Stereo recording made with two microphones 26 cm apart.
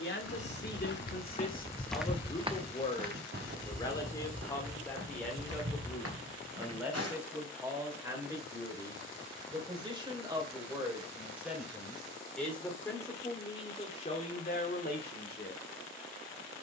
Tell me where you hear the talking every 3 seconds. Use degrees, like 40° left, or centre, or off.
30° left, 10° left, 10° right, 10° right, 20° left, 40° left.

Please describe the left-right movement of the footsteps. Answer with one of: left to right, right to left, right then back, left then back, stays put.
left to right.